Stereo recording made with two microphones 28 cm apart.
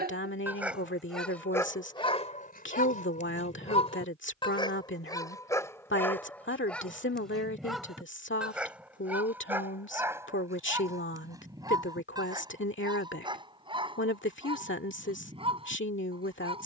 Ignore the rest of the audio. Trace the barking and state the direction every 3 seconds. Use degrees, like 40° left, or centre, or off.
10° left, 20° left, centre, 10° right, 20° right, 20° right.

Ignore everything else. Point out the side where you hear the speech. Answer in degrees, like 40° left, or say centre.
40° left.